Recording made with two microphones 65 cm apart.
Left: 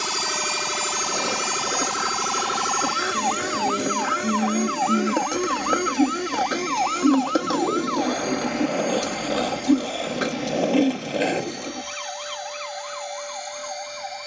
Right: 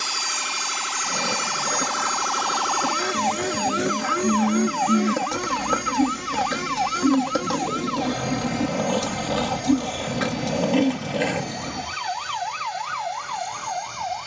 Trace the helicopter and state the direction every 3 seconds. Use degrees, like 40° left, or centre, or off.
centre, 30° right, 40° right, 50° right, 50° right.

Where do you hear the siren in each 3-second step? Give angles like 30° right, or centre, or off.
60° left, 10° left, 50° right, 70° right, 70° right.